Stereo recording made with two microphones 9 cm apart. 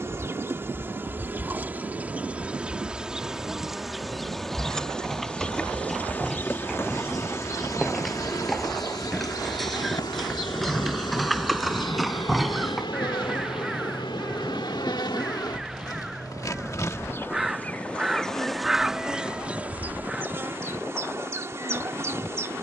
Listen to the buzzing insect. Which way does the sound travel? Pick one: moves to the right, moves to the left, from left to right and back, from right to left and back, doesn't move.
from right to left and back.